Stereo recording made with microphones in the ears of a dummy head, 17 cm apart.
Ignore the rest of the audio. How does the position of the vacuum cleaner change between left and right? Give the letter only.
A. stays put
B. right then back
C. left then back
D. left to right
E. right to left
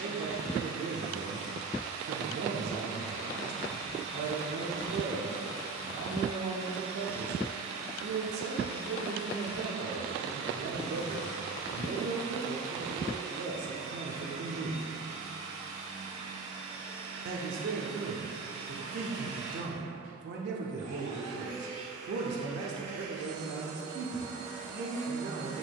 A.